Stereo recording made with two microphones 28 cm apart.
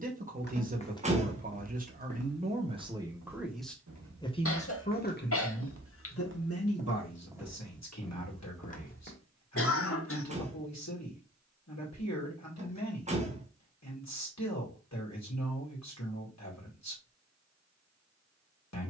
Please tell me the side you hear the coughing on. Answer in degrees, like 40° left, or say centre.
50° left.